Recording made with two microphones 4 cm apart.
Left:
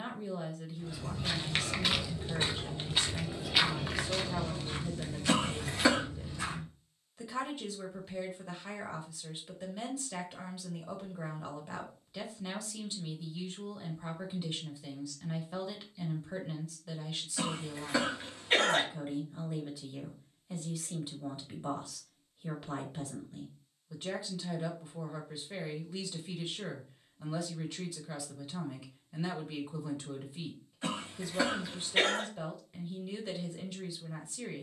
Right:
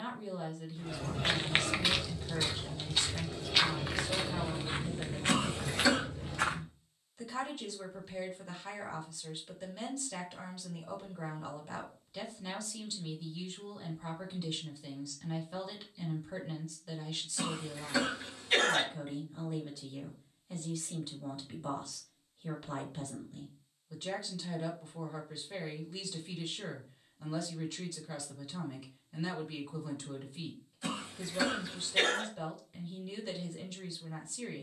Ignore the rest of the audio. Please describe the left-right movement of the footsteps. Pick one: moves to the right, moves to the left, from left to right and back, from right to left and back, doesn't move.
from right to left and back.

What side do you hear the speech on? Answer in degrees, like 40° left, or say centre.
10° left.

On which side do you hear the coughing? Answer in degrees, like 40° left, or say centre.
30° left.